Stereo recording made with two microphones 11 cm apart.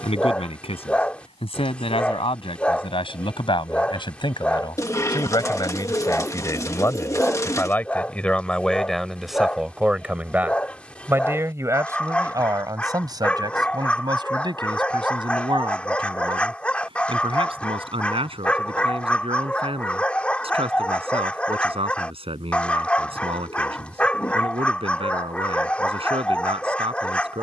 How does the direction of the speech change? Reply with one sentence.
In this clip you hear the speech travel towards the right.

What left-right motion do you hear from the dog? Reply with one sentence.
In this clip you hear the dog stay in one place.